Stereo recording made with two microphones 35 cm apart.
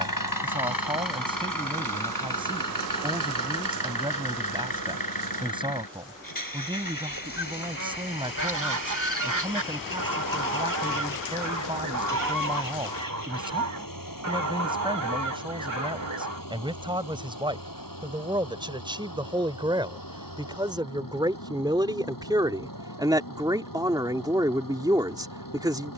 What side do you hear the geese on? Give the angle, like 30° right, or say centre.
60° right.